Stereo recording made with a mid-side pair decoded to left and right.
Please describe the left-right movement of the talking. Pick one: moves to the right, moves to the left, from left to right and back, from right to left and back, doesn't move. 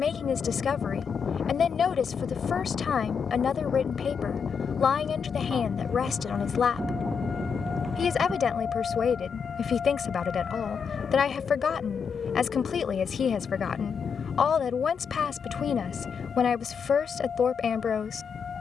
doesn't move.